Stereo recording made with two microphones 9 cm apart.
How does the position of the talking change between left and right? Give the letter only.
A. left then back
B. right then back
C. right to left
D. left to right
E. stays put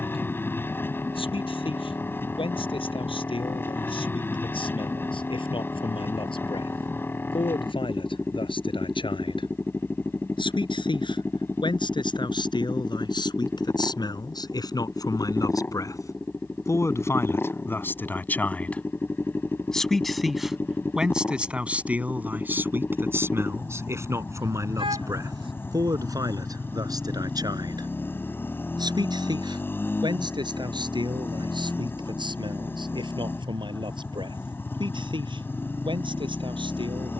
D.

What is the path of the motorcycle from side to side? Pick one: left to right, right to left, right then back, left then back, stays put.
stays put.